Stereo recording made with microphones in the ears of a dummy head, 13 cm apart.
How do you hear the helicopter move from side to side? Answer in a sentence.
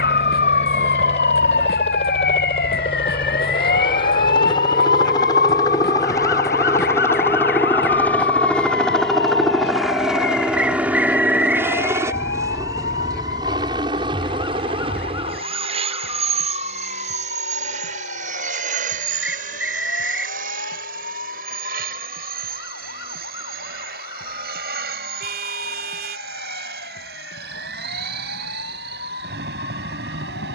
You can hear the helicopter move to the right.